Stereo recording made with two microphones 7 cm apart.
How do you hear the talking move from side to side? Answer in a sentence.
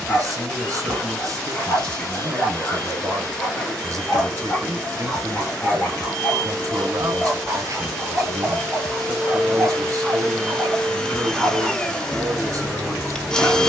You can hear the talking stay put.